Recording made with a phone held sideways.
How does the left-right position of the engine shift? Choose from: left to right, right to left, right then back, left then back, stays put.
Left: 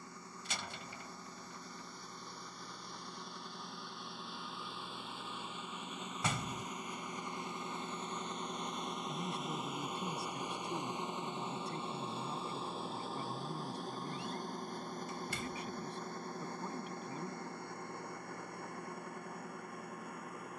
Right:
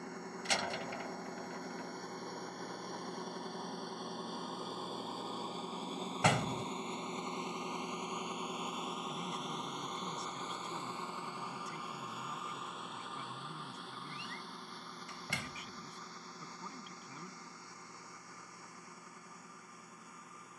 right to left.